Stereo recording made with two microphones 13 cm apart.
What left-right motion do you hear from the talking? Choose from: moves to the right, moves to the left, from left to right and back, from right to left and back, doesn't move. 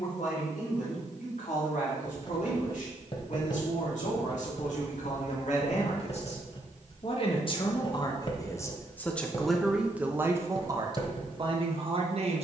moves to the right.